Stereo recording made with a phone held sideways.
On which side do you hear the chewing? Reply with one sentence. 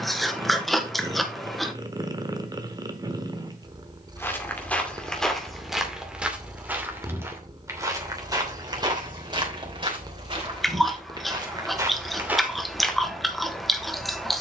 You can hear the chewing in the centre.